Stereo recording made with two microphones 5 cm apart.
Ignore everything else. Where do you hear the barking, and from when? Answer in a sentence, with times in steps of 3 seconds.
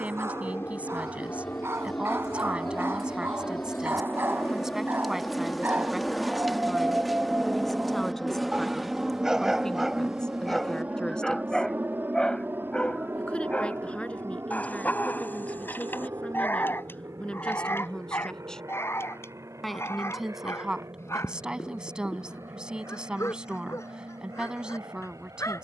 In this clip you hear the barking on the right from 0 s, in the centre from 9 s and on the left from 12 s.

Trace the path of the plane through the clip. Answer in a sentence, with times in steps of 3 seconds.
You can hear the plane on the left from 0 s, in the centre from 6 s and on the right from 9 s.